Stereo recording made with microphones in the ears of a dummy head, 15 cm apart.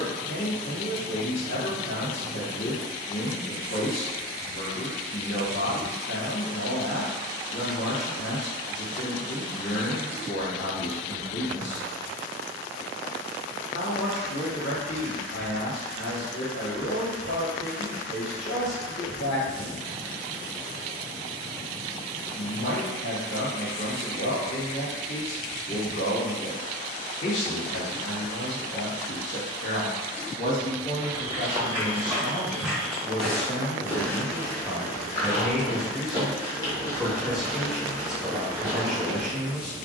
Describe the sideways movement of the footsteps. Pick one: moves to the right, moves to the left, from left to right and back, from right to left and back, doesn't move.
from right to left and back.